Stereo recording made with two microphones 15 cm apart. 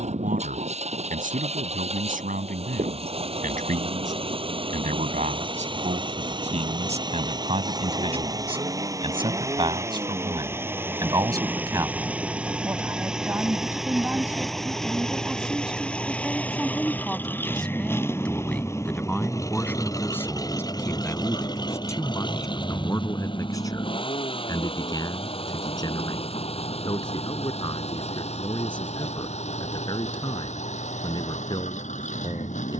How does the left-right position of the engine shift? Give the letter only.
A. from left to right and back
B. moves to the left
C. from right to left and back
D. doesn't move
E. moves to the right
B.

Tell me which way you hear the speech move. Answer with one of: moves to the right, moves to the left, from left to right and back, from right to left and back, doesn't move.
moves to the left.